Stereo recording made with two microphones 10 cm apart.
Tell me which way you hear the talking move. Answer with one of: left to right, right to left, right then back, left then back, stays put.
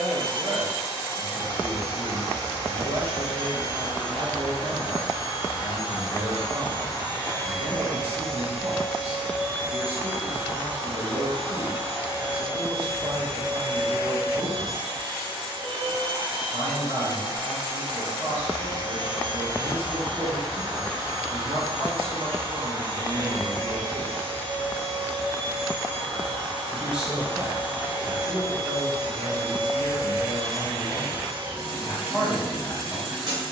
right to left.